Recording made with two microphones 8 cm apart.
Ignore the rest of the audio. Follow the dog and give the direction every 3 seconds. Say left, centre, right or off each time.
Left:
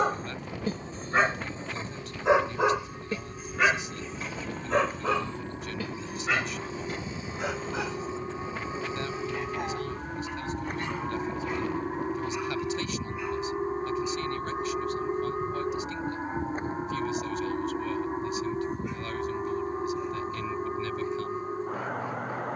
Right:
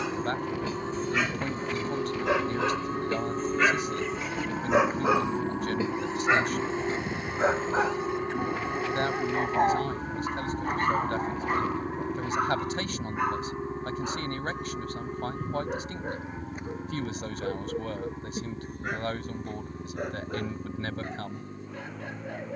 left, centre, right, right, right, right, right, right.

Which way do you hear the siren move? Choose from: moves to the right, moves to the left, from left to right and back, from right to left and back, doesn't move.
moves to the left.